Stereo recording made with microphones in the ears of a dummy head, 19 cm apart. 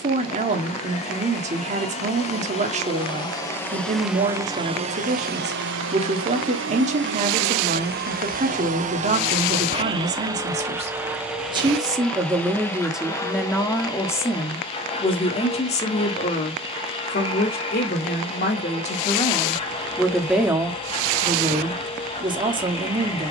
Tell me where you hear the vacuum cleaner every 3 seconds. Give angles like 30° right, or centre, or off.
30° left, 20° right, 50° right, 10° right, 20° left, 20° left, 20° left, 20° left.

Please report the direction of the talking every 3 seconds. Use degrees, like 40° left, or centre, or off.
30° right, 30° right, 30° right, 30° right, centre, 30° left, 20° left, 20° right.